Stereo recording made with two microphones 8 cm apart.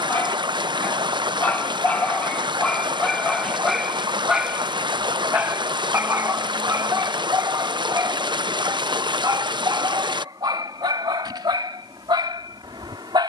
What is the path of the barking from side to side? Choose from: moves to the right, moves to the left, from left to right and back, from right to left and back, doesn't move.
moves to the right.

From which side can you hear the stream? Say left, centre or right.
right.